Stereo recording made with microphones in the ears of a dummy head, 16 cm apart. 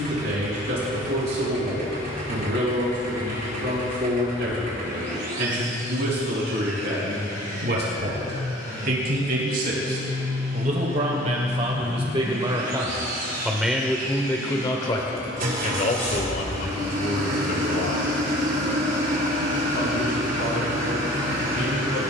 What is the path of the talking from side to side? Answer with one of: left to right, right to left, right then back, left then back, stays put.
right to left.